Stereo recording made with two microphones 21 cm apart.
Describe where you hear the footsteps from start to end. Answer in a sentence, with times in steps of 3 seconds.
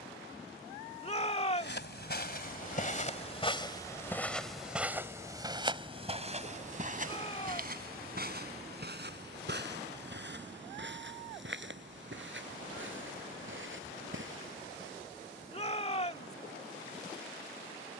You can hear the footsteps on the left from 0 s, in the centre from 3 s, on the right from 6 s and not at all from 15 s.